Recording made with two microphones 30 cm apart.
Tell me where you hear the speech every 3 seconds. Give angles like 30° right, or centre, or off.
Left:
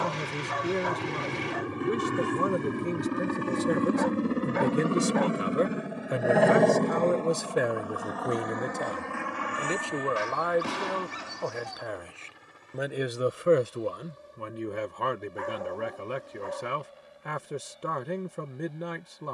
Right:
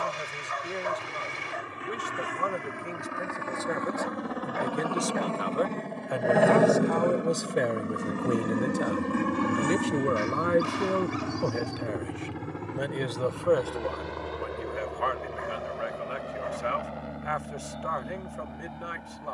50° left, 40° left, 10° left, 30° right, 20° left, 50° left, 50° left.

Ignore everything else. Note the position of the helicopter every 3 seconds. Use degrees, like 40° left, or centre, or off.
60° left, 30° left, 20° right, 50° right, 70° right, 70° right, 80° right.